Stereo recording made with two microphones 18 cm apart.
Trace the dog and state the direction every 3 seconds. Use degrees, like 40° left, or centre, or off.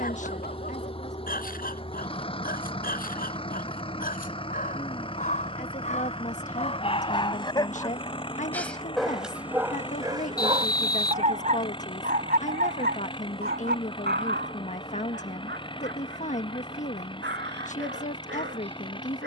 50° left, 50° left, 30° left, 20° right, 60° right, 80° right, 80° right.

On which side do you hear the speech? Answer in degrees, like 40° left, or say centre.
40° left.